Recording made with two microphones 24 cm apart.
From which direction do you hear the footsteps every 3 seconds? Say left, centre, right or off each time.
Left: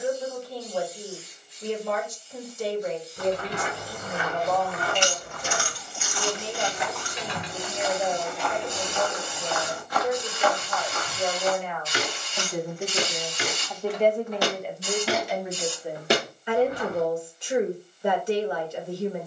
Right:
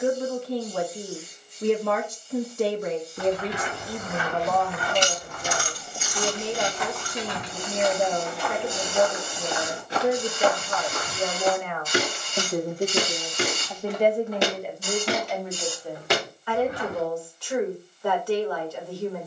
off, left, centre, right, right, left, off.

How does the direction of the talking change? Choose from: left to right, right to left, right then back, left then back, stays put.
right to left.